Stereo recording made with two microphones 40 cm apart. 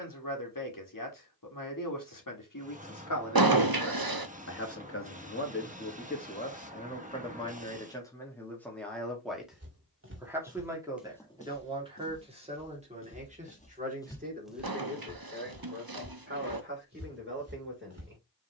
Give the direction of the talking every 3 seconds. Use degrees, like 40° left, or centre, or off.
60° left, 40° left, 10° left, 10° right, 20° right, 30° right.